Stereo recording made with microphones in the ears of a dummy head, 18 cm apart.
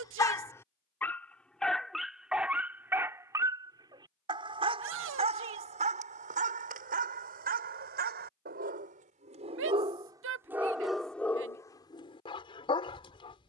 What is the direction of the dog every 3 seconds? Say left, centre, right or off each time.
centre, right, right, centre, left.